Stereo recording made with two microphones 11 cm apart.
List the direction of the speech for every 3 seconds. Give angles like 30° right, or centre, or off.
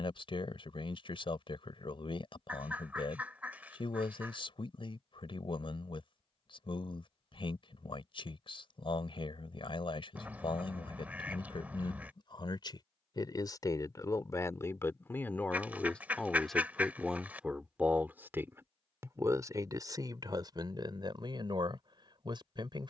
50° left, 50° left, 50° left, 50° left, 30° left, centre, 30° right, 50° right.